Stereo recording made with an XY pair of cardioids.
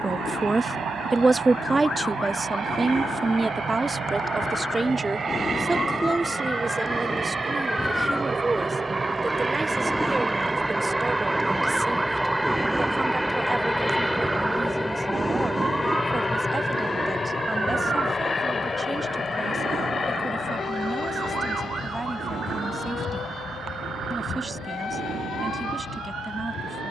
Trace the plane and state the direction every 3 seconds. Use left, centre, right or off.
right, right, right, centre, centre, left, left, left, left.